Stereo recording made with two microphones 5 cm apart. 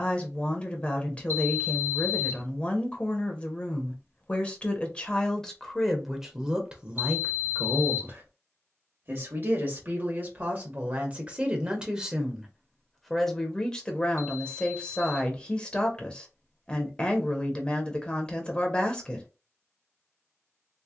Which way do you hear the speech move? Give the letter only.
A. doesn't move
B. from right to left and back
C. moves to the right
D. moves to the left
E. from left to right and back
E.